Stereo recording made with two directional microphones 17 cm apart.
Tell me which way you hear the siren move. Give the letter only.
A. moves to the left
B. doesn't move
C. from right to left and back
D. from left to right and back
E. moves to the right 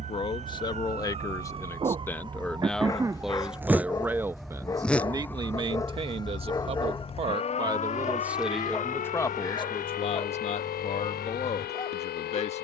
A.